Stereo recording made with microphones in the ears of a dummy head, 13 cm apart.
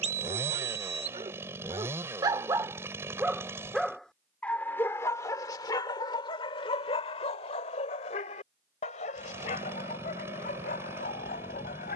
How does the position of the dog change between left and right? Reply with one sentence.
You can hear the dog move from right to left.